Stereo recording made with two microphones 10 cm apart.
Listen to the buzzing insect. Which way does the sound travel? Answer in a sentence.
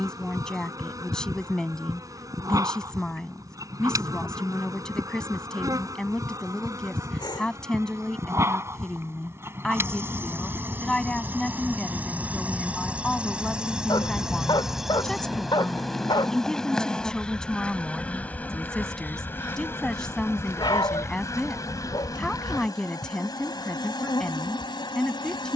In this clip you hear the buzzing insect go from the right side to the left.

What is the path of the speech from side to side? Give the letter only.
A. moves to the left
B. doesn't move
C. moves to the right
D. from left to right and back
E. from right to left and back
B.